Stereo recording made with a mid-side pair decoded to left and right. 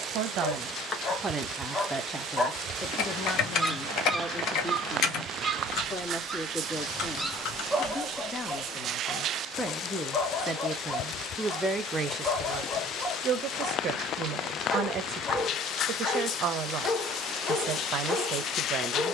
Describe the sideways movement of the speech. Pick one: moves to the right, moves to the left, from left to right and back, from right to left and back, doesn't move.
from right to left and back.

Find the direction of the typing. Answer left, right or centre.
left.